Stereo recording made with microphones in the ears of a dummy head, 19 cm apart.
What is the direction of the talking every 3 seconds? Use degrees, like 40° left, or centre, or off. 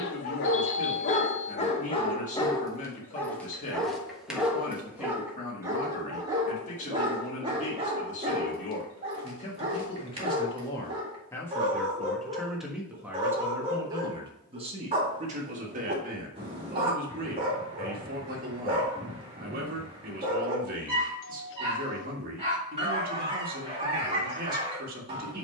40° left, 40° left, 40° left, 20° left, 10° right, 40° right, 40° right, 40° right, 40° right.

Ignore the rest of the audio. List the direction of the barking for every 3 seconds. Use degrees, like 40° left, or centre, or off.
30° left, centre, 20° right, 30° right, 30° right, 30° right, 30° right, 30° right, 30° right.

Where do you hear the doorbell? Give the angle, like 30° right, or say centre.
60° left.